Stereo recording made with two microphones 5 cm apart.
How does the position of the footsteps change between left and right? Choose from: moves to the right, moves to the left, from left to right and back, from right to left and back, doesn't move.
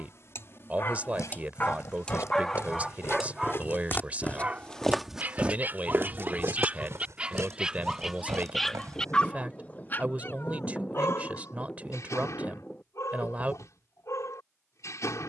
moves to the right.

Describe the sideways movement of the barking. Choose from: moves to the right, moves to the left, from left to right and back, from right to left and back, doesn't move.
from left to right and back.